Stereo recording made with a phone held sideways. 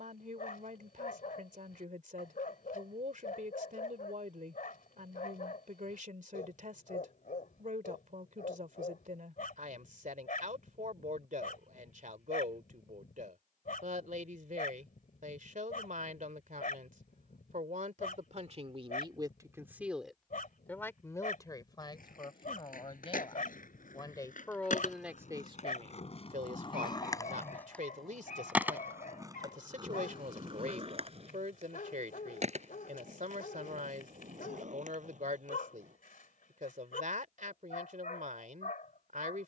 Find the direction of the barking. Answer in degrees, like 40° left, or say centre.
70° left.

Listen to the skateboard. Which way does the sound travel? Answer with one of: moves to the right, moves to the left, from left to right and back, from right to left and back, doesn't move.
moves to the right.